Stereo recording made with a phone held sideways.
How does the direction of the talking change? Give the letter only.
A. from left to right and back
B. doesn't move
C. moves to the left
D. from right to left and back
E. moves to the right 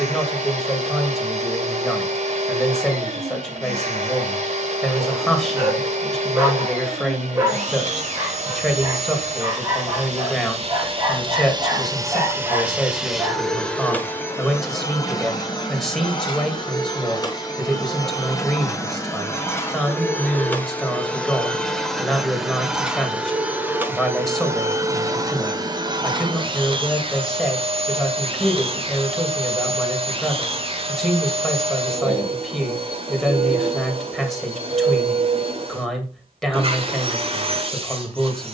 B.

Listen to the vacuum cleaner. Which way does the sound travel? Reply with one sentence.
In this clip you hear the vacuum cleaner go left and come back.